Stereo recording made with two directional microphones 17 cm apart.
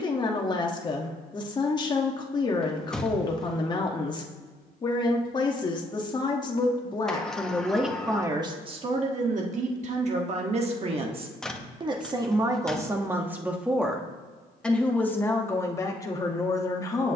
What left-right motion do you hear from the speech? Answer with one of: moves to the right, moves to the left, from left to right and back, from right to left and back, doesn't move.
from left to right and back.